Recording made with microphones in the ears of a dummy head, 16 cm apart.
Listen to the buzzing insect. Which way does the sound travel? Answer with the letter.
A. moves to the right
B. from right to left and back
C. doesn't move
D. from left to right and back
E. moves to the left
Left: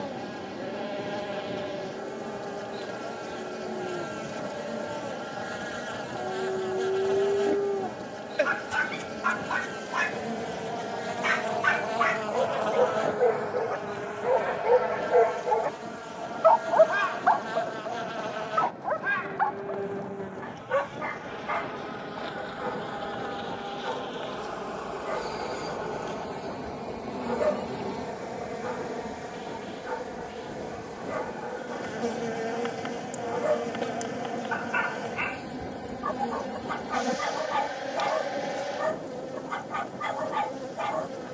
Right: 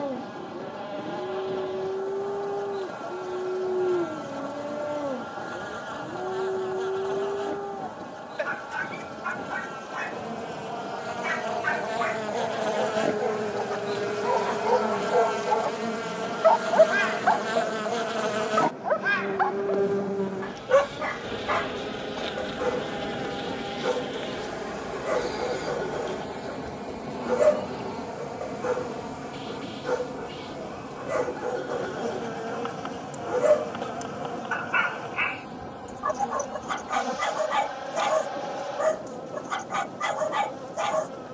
D.